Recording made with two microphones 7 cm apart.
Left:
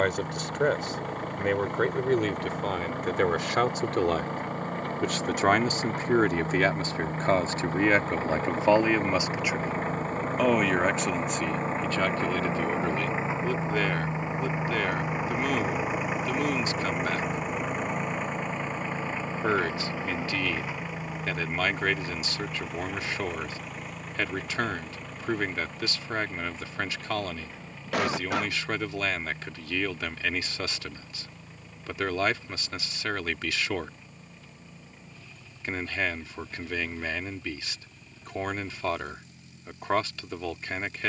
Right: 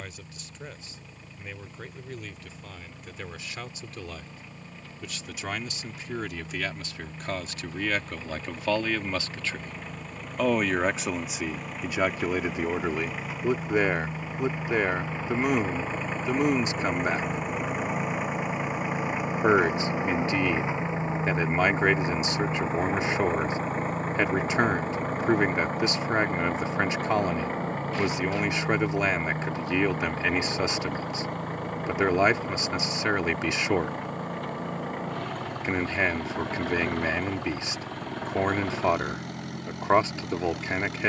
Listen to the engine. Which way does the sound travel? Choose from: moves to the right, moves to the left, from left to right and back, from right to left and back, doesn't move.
moves to the right.